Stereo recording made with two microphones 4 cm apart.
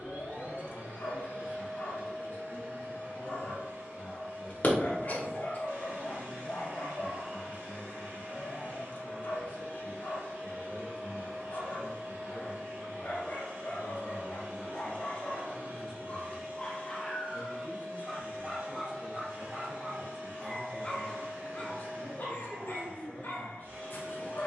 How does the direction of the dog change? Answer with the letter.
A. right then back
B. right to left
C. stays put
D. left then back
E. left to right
A.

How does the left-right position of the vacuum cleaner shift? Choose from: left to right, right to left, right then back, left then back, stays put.
stays put.